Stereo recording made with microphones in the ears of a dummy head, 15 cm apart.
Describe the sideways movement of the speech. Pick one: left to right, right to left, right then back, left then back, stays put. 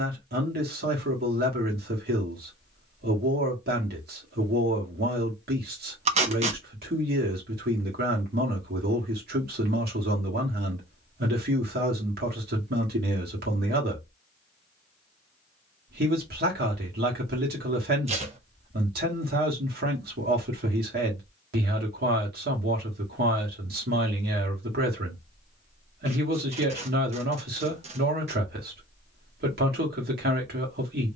stays put.